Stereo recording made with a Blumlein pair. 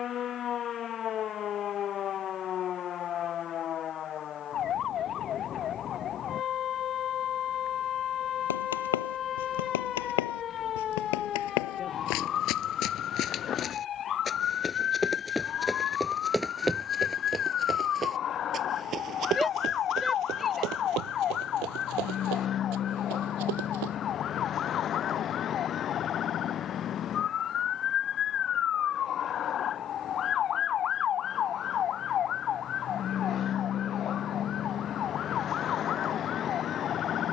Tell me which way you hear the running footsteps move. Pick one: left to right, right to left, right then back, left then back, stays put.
left to right.